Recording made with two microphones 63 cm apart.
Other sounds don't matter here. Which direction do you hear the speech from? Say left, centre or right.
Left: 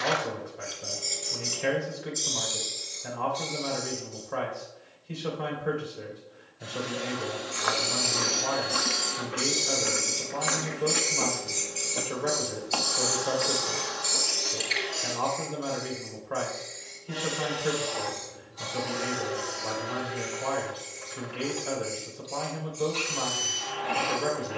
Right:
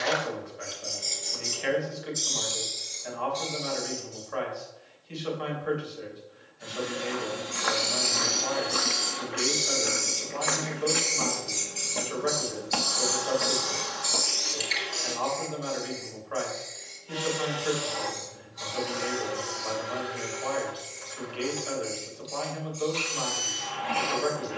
left.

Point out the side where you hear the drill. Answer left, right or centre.
right.